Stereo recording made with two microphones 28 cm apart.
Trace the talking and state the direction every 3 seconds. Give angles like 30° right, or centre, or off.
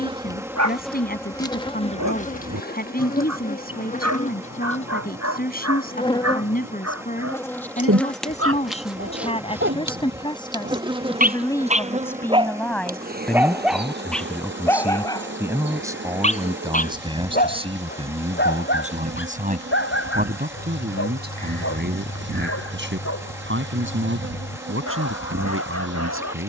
30° left, 30° left, 30° left, 20° left, centre, 10° right, 30° right, 40° right, 50° right.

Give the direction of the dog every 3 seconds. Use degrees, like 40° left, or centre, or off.
70° right, 70° right, 60° right, 40° right, centre, 30° left, 40° left, 50° left, 60° left.